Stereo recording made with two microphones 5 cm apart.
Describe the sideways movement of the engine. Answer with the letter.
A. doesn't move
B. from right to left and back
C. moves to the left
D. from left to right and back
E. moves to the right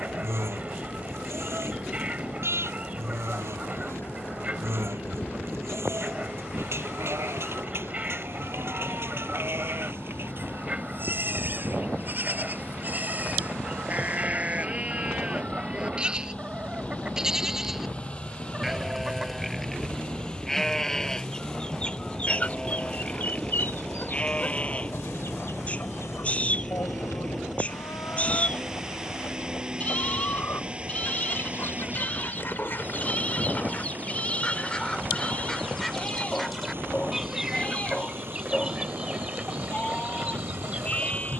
E.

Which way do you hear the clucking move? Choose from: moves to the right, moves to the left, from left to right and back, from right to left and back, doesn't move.
from right to left and back.